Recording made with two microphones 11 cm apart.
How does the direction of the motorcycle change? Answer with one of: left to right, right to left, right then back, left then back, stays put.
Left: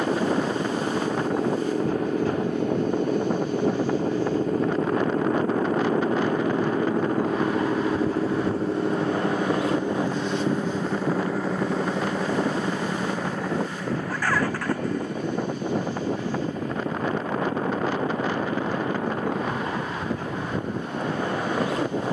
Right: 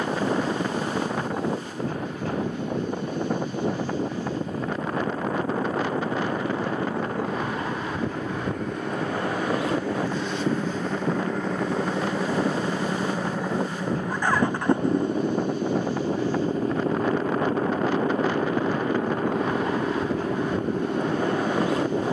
left to right.